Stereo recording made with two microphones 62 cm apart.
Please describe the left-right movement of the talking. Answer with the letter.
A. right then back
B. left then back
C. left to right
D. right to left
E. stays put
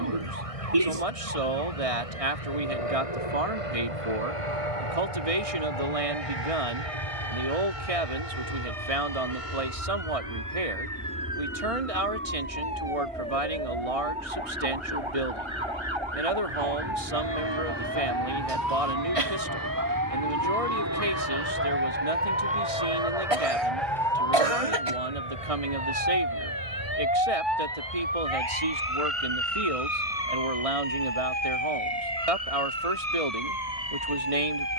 E.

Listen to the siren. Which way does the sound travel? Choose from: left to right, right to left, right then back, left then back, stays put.
right to left.